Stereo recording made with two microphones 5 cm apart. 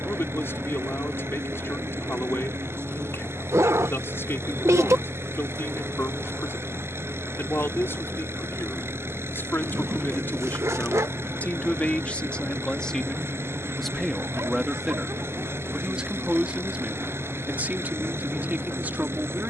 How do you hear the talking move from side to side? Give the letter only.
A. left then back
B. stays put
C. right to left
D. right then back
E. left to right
E.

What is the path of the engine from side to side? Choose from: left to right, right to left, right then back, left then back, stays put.
stays put.